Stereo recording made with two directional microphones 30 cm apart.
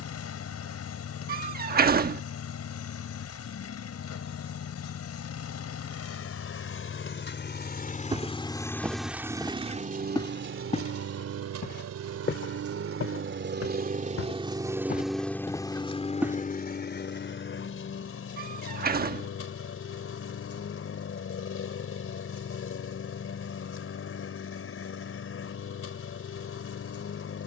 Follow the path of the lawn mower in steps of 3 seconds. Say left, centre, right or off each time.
left, left, left, right, right, left, left, left, left.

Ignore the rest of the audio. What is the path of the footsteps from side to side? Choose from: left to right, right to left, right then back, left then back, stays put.
left then back.